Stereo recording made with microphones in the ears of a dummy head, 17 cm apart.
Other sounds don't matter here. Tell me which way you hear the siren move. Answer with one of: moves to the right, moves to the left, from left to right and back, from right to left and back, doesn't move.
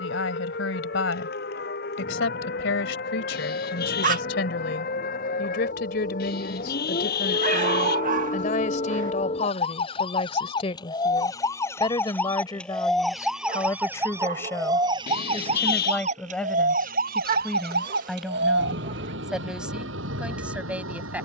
moves to the right.